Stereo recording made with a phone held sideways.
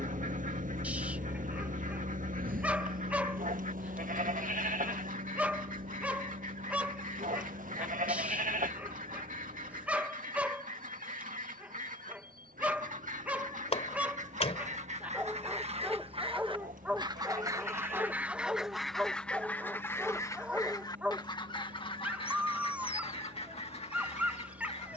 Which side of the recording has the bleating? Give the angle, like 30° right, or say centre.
80° right.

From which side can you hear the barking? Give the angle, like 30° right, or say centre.
10° right.